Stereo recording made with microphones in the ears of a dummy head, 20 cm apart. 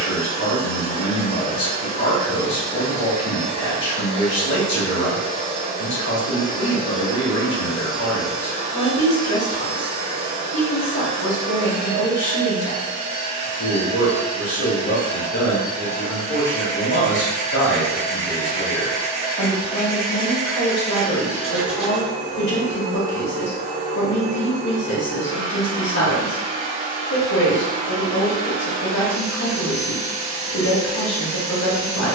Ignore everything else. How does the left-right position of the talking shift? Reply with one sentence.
You can hear the talking stay put.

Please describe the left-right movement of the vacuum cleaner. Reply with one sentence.
In this clip you hear the vacuum cleaner stay in one place.